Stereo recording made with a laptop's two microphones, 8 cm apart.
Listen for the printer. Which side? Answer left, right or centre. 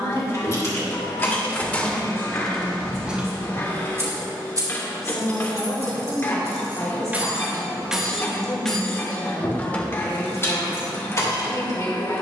left.